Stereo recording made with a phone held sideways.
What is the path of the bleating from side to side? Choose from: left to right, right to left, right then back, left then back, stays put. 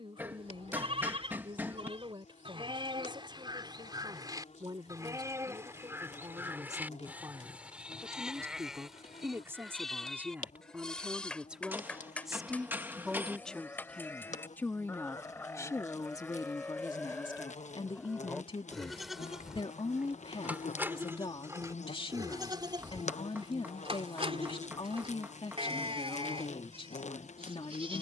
left then back.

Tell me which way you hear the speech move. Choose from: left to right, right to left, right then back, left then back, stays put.
right to left.